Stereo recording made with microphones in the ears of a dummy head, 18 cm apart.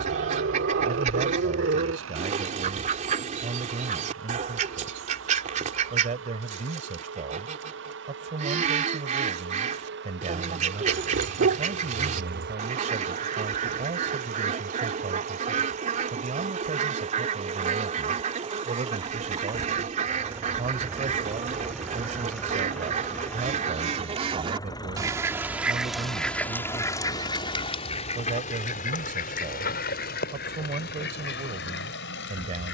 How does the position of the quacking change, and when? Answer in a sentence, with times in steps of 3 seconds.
In this clip you hear the quacking on the right from 0 s, in the centre from 24 s and on the left from 27 s.